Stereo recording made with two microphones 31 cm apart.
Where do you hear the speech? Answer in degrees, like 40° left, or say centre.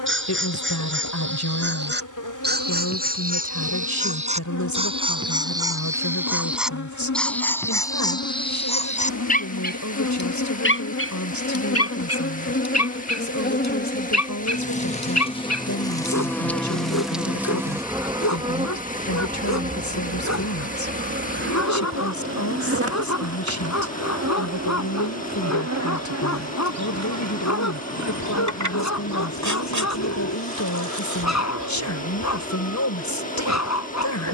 60° left.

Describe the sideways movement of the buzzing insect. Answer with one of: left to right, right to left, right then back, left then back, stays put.
left to right.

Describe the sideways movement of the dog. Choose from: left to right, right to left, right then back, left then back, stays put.
right to left.